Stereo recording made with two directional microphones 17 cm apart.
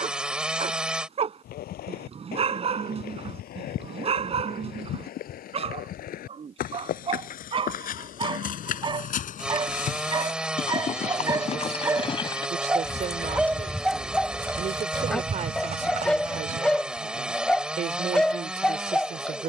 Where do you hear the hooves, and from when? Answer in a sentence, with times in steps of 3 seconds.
In this clip you hear the hooves on the left from 0 s, in the centre from 12 s, on the right from 15 s and not at all from 18 s.